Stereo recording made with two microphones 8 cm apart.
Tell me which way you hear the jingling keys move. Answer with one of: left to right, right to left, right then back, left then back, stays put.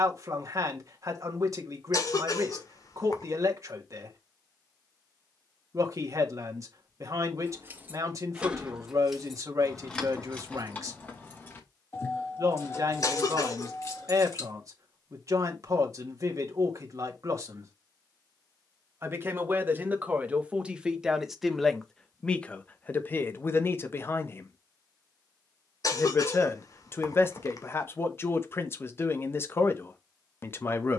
right to left.